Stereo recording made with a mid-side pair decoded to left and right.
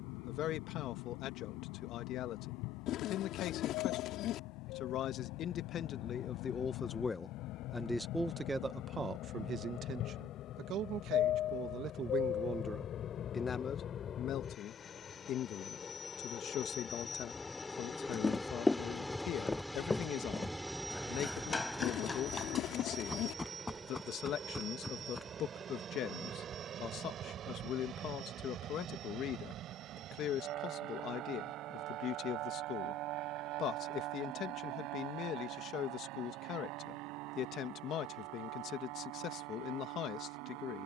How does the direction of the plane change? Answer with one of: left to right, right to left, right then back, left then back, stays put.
left to right.